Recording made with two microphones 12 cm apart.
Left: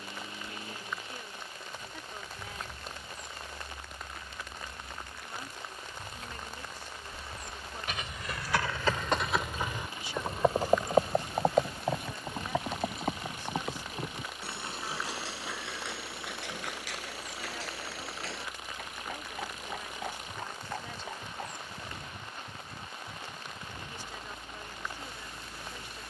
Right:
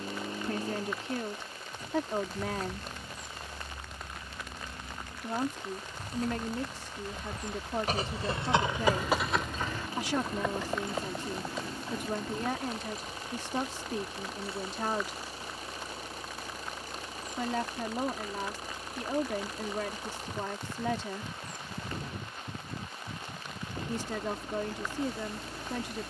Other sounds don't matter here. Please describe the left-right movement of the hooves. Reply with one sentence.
In this clip you hear the hooves move from right to left.